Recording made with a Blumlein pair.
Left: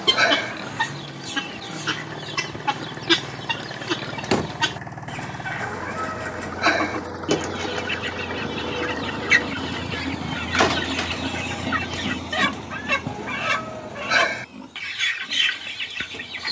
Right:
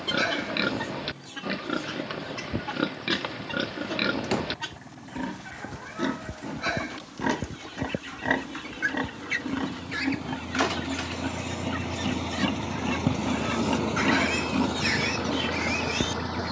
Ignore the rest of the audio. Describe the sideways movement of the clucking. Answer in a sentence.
You can hear the clucking stay in one place.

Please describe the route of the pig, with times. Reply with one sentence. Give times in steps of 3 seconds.
In this clip you hear the pig on the right from 0 s, in the centre from 9 s and on the right from 12 s.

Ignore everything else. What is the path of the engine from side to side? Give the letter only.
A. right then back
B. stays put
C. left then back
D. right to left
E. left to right
E.